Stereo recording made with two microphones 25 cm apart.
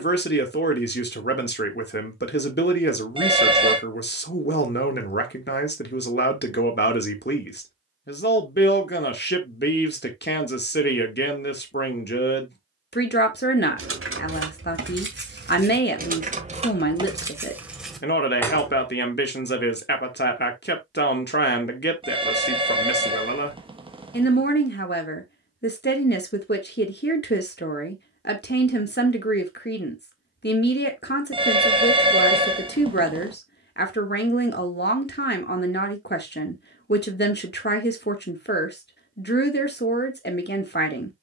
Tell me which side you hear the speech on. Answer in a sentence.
In this clip you hear the speech on the left.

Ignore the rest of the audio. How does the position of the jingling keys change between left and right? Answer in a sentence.
You can hear the jingling keys go from the right side to the left.